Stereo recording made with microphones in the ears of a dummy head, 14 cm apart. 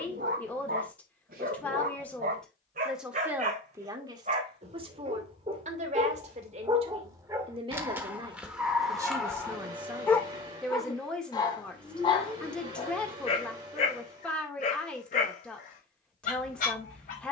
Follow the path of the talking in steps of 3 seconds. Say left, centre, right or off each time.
centre, right, right, centre, centre, centre.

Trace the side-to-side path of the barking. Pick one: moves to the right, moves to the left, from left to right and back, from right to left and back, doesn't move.
moves to the left.